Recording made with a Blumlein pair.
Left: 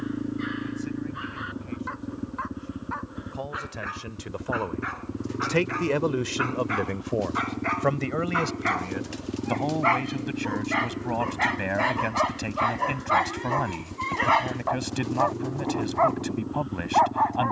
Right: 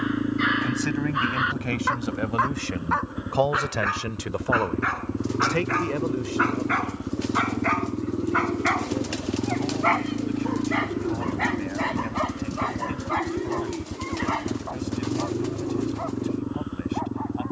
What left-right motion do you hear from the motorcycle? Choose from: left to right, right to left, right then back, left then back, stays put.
stays put.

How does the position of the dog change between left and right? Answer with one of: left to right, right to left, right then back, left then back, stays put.
right to left.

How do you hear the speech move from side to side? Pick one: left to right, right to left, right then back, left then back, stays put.
right to left.